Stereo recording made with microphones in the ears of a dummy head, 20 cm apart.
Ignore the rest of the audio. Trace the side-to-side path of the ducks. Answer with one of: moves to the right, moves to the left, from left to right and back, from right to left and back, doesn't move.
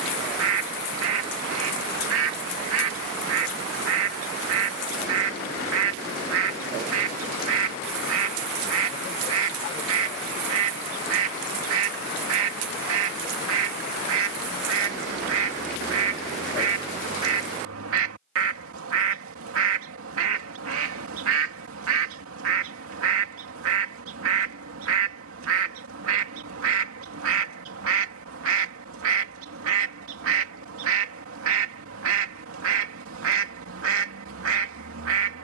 doesn't move.